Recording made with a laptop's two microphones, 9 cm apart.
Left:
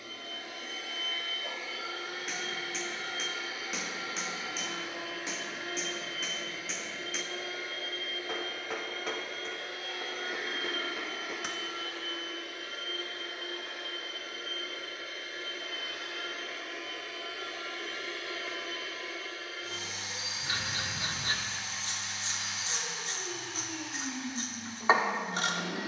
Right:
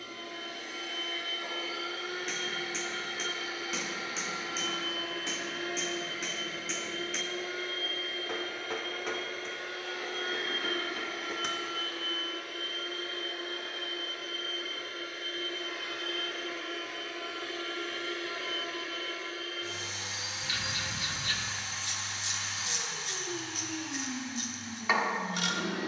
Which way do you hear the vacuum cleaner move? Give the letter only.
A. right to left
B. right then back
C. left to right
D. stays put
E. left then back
D.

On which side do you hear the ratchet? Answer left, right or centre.
left.